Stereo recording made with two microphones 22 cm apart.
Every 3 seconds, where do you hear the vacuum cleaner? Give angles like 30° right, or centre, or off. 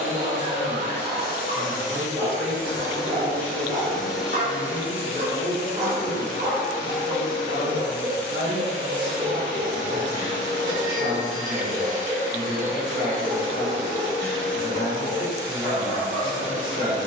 40° left, centre, 20° right, 20° right, 20° right, 20° right.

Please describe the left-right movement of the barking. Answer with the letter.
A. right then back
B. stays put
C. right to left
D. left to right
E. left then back
C.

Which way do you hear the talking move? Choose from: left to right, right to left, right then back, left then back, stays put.
stays put.